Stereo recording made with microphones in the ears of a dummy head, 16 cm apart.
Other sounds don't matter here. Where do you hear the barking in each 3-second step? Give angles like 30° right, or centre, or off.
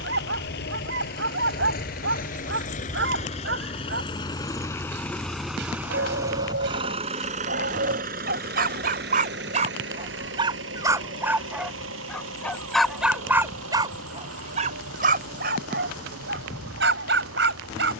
70° right, 70° right, 60° right, 30° right, 10° right, 60° right.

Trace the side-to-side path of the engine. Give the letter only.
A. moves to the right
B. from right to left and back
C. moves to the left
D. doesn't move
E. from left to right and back
A.